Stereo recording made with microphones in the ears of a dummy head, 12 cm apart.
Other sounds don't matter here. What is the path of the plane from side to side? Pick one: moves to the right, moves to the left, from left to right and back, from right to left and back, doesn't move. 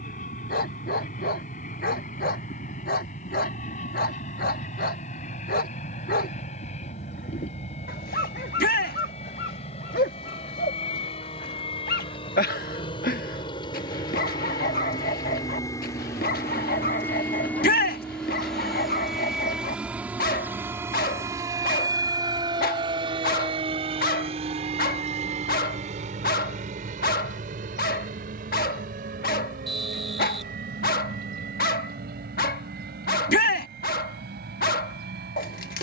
moves to the right.